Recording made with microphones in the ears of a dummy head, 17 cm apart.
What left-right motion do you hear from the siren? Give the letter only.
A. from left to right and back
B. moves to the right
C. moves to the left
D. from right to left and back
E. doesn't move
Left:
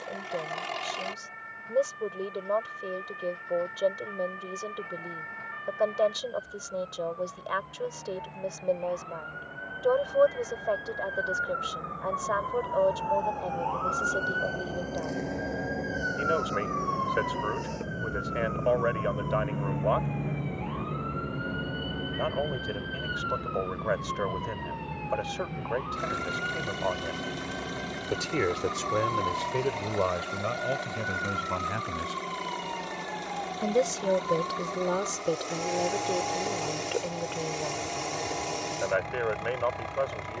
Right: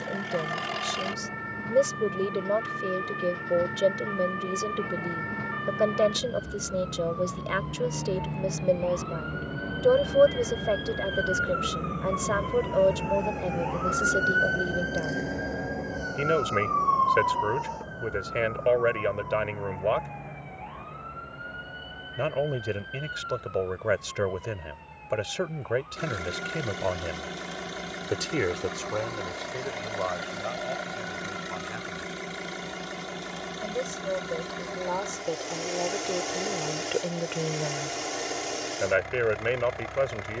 C.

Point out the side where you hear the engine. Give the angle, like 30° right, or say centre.
10° right.